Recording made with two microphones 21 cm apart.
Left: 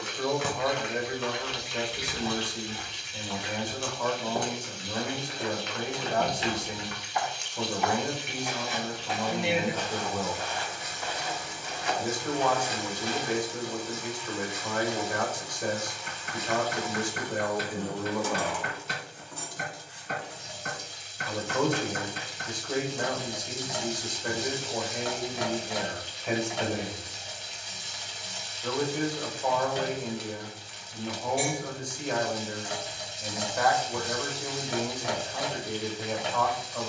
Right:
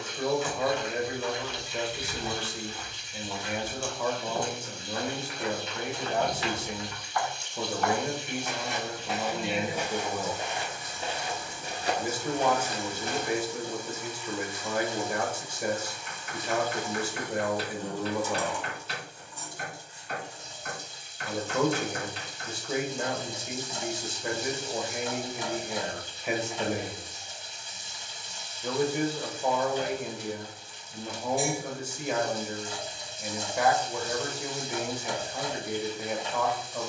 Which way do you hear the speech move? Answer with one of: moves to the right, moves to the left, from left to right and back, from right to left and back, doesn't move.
doesn't move.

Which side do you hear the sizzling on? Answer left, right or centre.
left.